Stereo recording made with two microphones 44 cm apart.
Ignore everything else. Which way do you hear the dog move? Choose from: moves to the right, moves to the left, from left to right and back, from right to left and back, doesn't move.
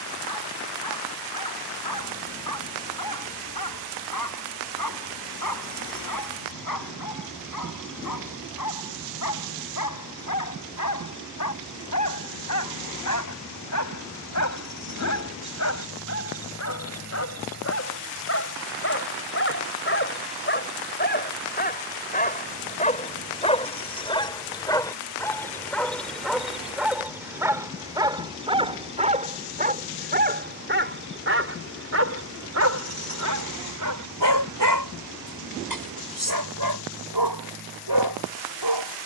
moves to the right.